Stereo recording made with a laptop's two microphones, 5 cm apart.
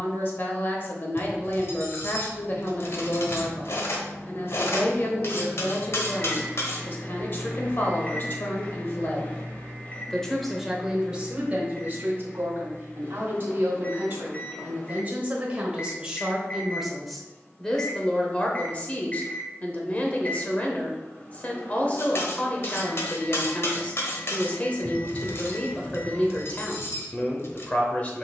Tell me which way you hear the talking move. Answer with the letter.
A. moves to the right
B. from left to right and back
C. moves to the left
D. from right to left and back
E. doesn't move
B.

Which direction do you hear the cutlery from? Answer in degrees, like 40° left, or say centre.
60° left.